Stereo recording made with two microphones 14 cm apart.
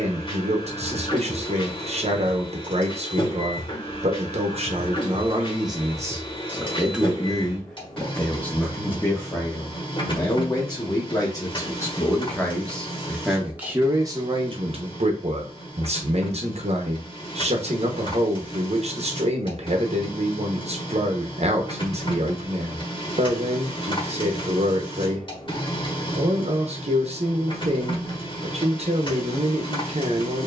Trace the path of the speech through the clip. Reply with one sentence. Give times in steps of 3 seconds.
You can hear the speech on the right from 0 s, in the centre from 6 s, on the left from 9 s, in the centre from 12 s and on the right from 15 s.